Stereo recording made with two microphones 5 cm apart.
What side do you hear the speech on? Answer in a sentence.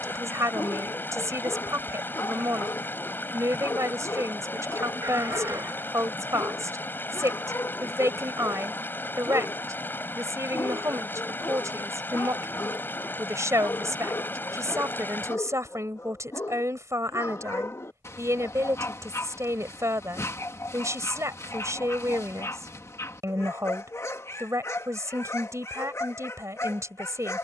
In this clip you hear the speech on the right.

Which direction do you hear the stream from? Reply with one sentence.
You can hear the stream on the left.